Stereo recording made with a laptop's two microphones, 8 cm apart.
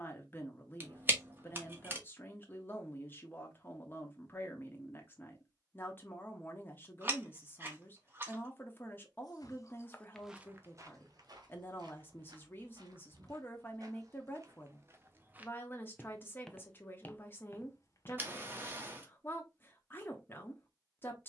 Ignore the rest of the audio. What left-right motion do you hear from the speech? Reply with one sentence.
In this clip you hear the speech stay put.